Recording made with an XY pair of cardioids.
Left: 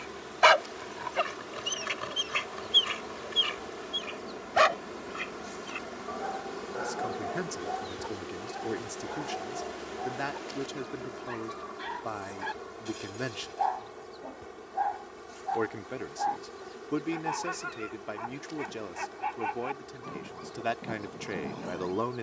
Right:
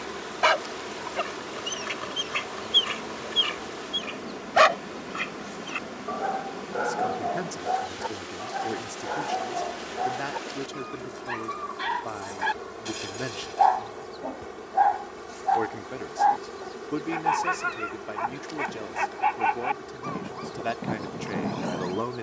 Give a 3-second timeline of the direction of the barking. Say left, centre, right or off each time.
centre, right, right, right, right, right, right, right.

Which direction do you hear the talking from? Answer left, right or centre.
centre.